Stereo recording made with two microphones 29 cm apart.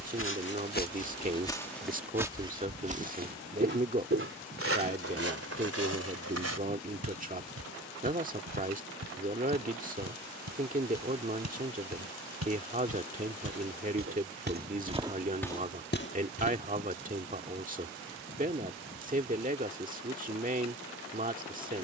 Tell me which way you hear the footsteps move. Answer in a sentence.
In this clip you hear the footsteps move from left to right and back again.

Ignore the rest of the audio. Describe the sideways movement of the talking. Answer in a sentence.
In this clip you hear the talking stay put.